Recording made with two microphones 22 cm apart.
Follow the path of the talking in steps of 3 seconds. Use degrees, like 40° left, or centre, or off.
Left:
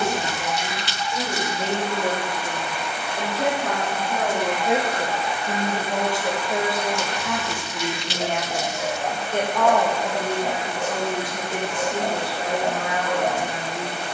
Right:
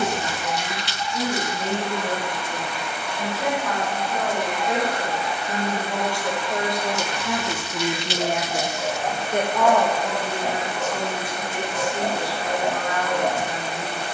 70° left, 50° left, 10° right, 30° left, 60° left.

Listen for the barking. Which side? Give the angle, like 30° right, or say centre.
centre.